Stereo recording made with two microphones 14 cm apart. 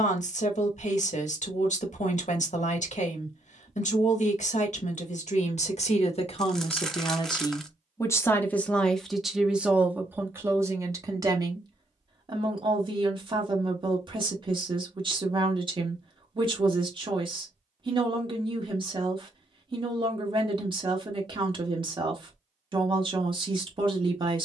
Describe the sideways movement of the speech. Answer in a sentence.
You can hear the speech go from the left side to the right.